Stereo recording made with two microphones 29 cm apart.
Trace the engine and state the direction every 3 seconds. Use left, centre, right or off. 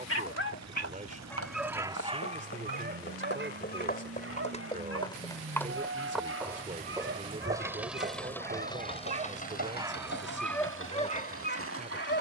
right, right, centre, left.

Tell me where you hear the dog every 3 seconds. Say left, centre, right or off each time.
centre, right, right, centre.